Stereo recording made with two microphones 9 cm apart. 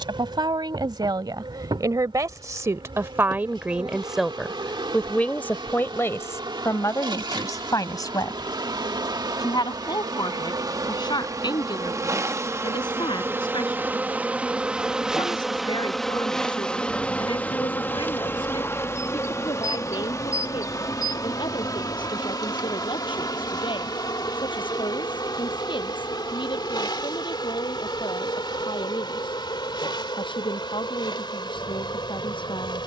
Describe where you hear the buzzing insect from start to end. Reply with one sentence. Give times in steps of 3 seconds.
You can hear the buzzing insect on the right from 0 s, in the centre from 15 s and on the left from 18 s.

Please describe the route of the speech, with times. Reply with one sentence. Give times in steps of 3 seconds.
In this clip you hear the speech on the right from 0 s, in the centre from 3 s and on the left from 6 s.